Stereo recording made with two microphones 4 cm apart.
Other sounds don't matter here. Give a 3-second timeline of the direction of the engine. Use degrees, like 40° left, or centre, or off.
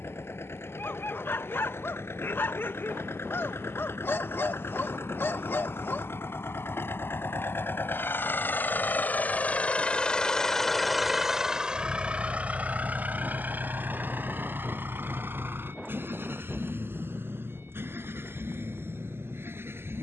80° left, 70° left, 60° left, 10° left, 50° right, 70° right, 70° right.